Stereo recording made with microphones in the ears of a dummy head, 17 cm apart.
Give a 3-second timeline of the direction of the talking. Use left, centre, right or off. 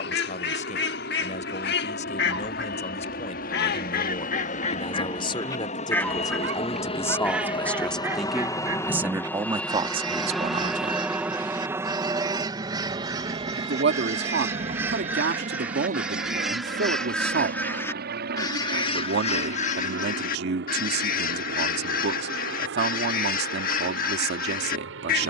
left, left, centre, right, right, right, right, right, right.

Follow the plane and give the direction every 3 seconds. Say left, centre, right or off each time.
left, left, left, centre, right, right, right, right, right.